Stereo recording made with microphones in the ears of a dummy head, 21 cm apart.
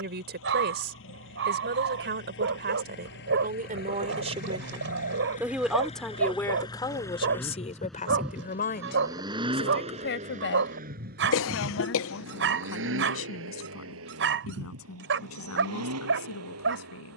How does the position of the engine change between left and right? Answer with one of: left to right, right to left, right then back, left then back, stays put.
left to right.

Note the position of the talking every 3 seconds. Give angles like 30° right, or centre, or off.
50° right, 20° right, 30° left, 50° left, 60° left, 70° left.